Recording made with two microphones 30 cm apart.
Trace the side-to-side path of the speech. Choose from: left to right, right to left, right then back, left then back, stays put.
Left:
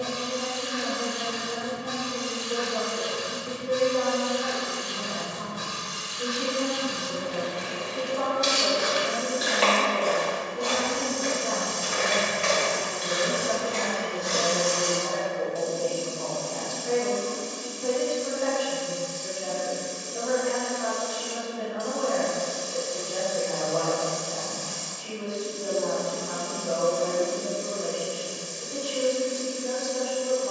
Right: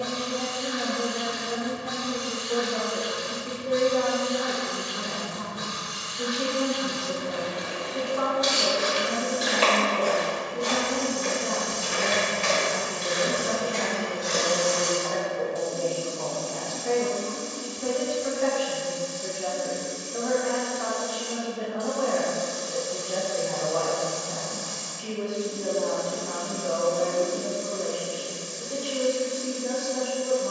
stays put.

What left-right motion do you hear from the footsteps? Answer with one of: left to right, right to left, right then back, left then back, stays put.
right then back.